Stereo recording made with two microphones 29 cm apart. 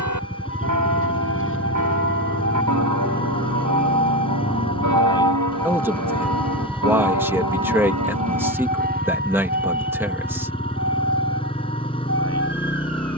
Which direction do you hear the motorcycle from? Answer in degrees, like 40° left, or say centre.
20° left.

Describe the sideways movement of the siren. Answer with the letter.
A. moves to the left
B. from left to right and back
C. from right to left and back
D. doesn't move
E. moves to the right
E.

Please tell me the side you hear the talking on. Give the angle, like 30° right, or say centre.
10° right.